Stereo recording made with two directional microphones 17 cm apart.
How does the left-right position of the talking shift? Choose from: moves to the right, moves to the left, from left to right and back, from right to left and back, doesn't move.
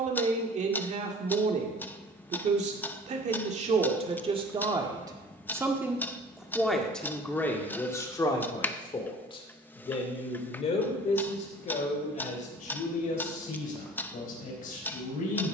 moves to the left.